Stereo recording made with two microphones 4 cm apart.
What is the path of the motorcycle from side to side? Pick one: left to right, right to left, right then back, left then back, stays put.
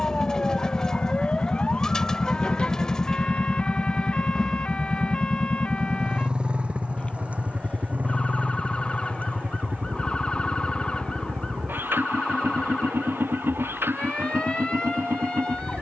left to right.